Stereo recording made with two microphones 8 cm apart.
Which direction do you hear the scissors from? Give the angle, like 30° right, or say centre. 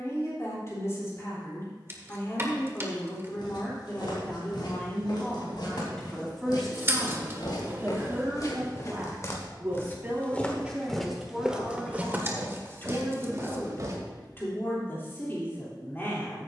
30° right.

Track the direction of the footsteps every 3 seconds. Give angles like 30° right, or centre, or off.
off, 70° left, 60° left, 10° left, 40° right, off.